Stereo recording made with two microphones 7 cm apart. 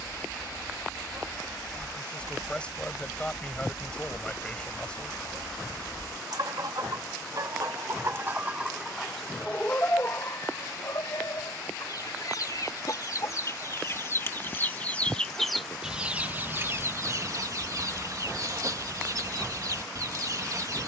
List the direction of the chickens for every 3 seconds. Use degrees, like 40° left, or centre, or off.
60° right, 60° right, 40° right, 40° left, 40° left, 30° right, 50° right.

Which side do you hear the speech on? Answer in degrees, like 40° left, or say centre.
10° left.